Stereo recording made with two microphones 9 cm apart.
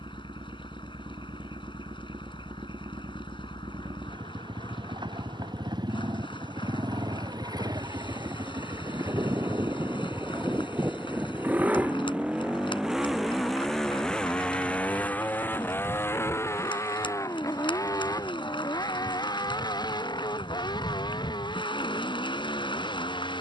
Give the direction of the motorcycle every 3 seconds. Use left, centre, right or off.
right, right, right, right, centre, left, left, left.